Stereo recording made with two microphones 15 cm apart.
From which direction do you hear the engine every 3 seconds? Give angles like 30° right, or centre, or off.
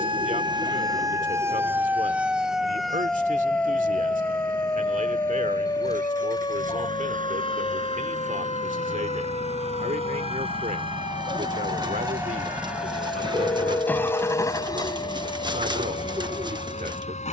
70° right, 70° right, 60° right, 40° right, 10° left, 40° left.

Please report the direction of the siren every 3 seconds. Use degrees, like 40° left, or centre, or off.
20° right, 20° left, 30° left, 40° left, 50° left, 50° left.